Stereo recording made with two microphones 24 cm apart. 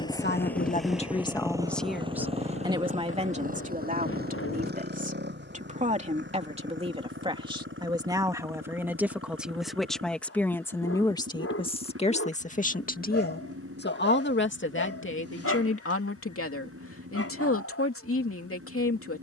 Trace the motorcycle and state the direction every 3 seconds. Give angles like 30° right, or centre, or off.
10° right, 40° right, 50° right, 60° right, 60° right, 60° right, 60° right.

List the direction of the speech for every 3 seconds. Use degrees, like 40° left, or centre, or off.
20° left, 30° right, 20° right, 10° left, 40° left, 60° left, 70° left.